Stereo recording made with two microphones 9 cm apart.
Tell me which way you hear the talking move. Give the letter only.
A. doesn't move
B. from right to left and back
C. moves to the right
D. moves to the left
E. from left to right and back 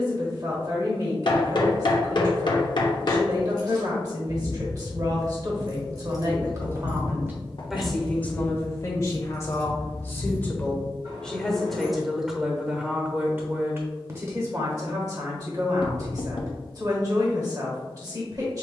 B.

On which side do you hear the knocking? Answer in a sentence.
You can hear the knocking on the left.